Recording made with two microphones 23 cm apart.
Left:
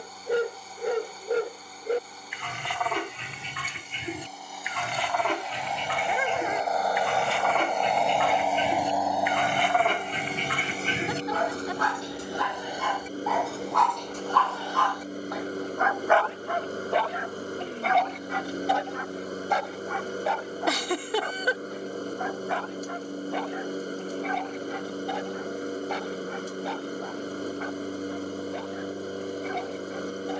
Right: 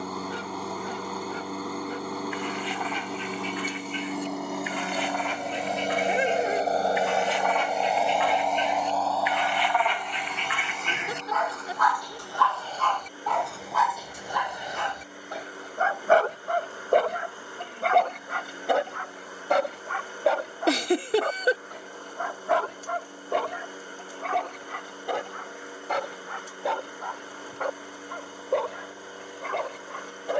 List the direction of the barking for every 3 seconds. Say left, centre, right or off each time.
left, left, left, left, centre, right, right, right, right, right.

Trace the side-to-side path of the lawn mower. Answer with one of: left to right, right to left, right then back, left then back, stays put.
right to left.